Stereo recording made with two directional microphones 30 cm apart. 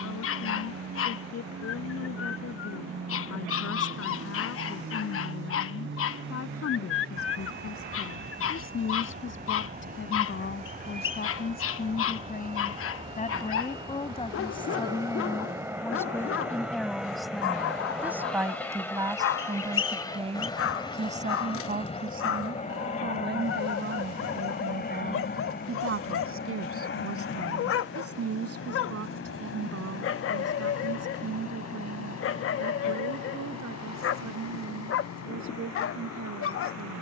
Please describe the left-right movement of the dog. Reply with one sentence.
You can hear the dog stay in one place.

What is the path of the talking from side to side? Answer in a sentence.
You can hear the talking go from the left side to the right.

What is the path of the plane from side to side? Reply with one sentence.
In this clip you hear the plane move from right to left.